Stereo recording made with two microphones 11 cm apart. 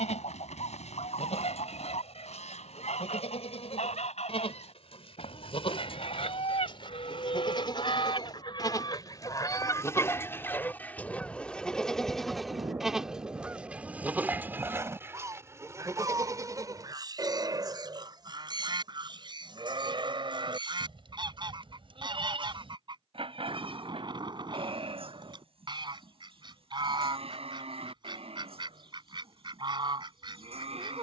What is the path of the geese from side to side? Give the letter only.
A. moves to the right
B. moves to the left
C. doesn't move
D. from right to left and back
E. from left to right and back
A.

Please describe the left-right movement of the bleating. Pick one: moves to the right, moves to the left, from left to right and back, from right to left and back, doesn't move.
moves to the right.